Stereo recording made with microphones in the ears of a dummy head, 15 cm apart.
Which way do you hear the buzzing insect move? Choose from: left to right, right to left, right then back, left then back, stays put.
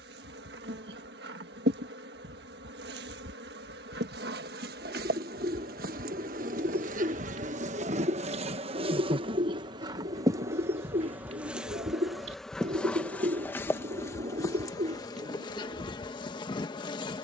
right to left.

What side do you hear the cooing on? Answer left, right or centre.
right.